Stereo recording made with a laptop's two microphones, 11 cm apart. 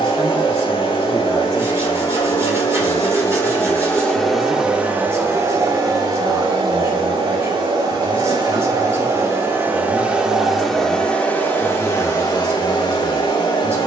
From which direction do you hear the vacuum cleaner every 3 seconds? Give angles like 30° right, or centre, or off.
50° left, centre, 40° right, centre, 40° left.